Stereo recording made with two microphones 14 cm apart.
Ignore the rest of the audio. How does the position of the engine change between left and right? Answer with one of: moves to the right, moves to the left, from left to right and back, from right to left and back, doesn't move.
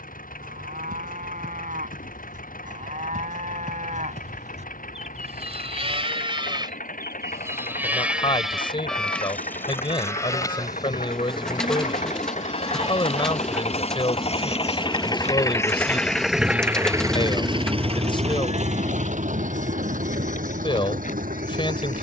moves to the right.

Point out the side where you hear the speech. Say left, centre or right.
left.